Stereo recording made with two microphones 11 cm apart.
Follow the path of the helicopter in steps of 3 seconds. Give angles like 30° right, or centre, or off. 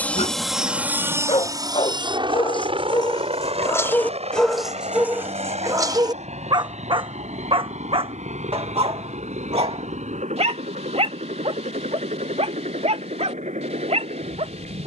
30° right, 60° right, 70° right, 80° right, 80° right.